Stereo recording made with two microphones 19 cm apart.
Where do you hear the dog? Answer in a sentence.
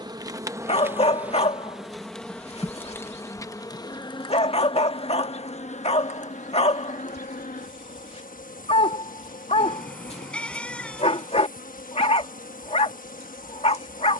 You can hear the dog on the left.